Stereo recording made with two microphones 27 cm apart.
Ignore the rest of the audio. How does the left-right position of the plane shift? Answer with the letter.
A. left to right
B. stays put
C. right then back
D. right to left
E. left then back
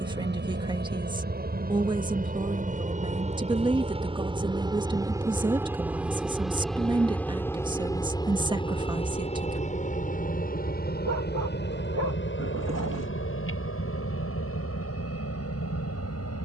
D.